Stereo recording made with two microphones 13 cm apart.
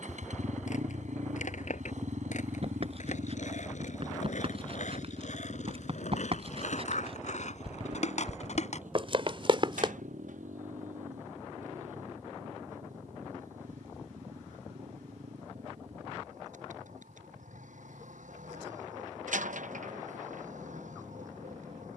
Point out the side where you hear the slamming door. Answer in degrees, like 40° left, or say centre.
80° right.